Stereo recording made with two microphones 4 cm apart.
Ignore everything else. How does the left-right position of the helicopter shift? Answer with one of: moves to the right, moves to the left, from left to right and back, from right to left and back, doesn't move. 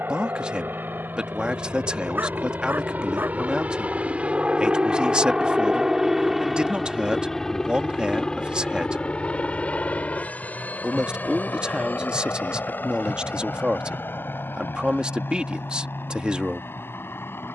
moves to the left.